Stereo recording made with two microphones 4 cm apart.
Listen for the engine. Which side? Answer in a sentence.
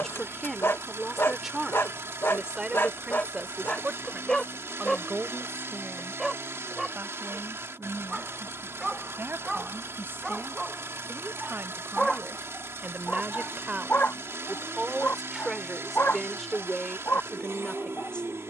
In this clip you hear the engine on the right.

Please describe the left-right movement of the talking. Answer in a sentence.
You can hear the talking go right and come back.